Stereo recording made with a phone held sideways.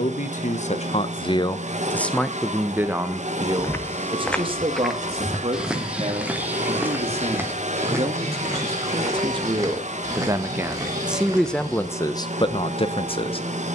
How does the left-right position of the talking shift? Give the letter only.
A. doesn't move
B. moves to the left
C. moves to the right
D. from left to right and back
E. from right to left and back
D.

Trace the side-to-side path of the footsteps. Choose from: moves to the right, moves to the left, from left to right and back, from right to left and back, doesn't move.
moves to the right.